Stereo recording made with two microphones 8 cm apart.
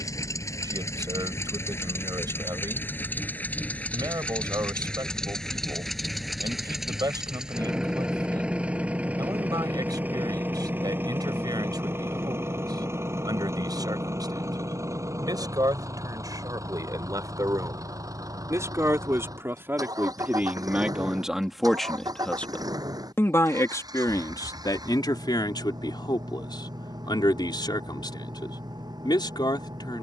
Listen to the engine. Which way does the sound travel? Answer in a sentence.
You can hear the engine move from left to right.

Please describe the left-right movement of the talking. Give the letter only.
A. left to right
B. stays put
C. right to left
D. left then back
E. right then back
C.